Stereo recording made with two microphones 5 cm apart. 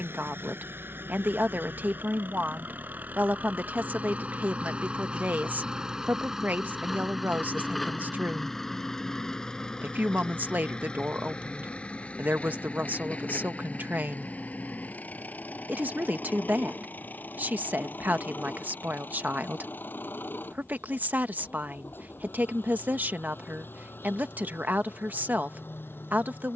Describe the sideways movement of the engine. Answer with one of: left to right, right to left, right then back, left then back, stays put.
right to left.